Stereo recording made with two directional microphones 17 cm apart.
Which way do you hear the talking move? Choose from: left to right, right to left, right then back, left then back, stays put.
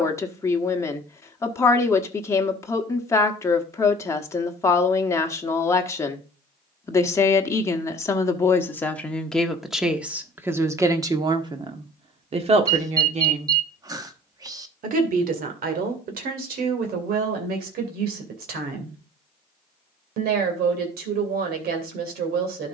left to right.